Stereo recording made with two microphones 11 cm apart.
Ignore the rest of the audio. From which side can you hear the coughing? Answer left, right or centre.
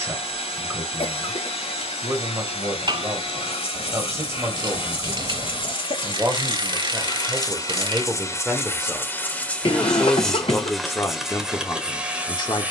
left.